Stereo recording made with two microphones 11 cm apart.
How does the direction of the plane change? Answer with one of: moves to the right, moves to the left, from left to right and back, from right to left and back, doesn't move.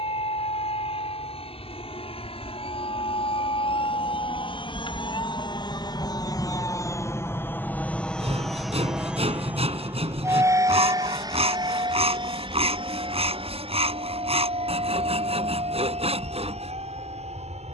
moves to the right.